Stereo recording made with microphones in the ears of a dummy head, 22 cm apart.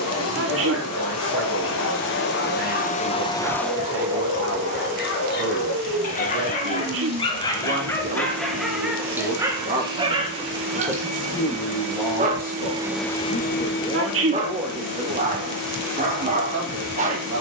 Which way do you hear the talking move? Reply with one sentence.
In this clip you hear the talking go left and come back.